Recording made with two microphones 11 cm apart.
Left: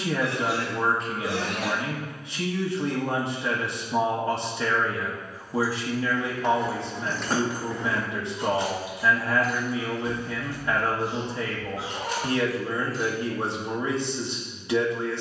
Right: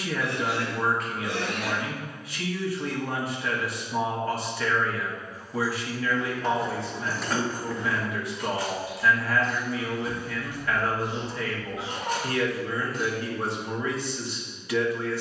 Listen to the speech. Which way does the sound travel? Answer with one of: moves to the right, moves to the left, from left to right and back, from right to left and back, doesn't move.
doesn't move.